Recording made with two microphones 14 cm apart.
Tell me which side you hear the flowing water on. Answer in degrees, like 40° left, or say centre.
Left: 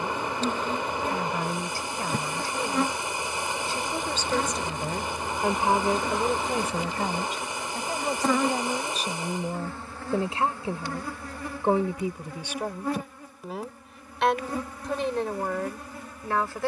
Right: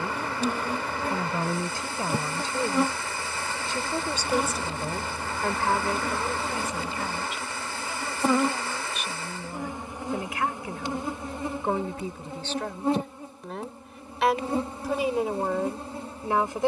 20° left.